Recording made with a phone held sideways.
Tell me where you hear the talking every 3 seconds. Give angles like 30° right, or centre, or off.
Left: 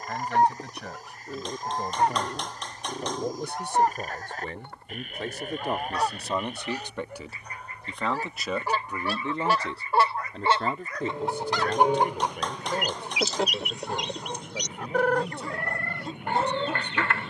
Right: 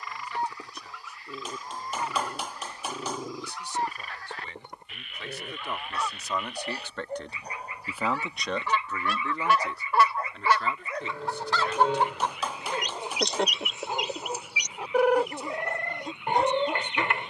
70° left, 50° left, 10° left, 40° left, 60° left, 60° left.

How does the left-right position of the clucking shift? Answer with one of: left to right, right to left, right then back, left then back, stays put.
left to right.